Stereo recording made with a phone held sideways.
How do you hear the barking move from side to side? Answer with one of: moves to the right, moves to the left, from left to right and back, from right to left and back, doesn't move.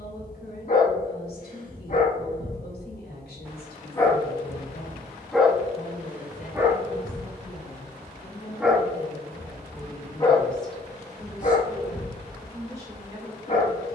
from left to right and back.